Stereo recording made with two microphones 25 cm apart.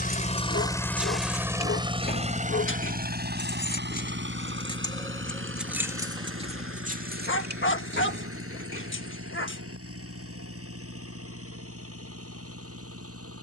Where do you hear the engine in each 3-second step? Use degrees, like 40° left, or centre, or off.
10° right, 50° right, 60° right, 60° right, 70° right.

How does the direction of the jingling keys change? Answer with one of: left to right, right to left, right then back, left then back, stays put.
left then back.